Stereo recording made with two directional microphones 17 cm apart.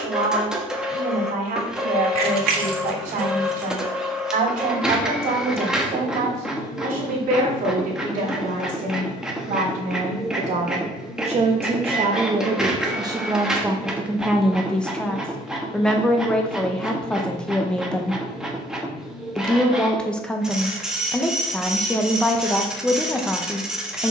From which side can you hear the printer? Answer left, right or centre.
centre.